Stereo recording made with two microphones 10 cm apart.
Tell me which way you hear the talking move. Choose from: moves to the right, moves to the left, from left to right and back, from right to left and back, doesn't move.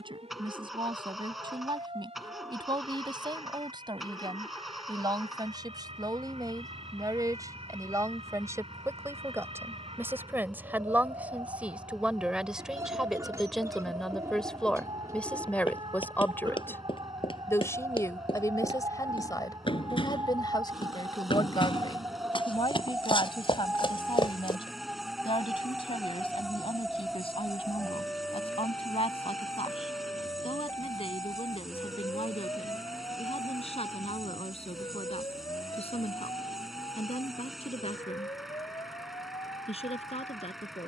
moves to the left.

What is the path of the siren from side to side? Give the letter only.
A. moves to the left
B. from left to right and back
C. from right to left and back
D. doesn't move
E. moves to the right
A.